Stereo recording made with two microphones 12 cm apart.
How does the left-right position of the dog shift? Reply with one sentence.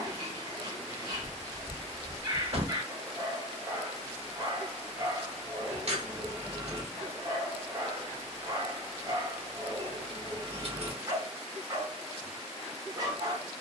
You can hear the dog stay put.